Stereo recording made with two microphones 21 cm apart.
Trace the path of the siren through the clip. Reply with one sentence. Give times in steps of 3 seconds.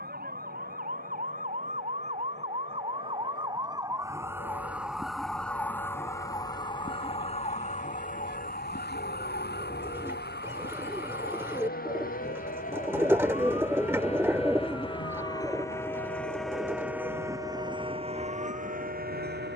In this clip you hear the siren on the right from 0 s, in the centre from 3 s and on the left from 6 s.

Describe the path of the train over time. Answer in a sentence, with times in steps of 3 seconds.
You can hear the train on the left from 0 s, in the centre from 15 s and on the right from 18 s.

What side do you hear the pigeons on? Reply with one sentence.
In this clip you hear the pigeons in the centre.